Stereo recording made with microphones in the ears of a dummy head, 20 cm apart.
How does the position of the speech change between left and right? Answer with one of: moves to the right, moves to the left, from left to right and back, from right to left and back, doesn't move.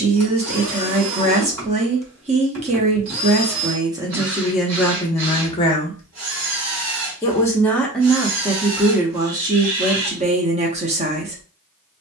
from right to left and back.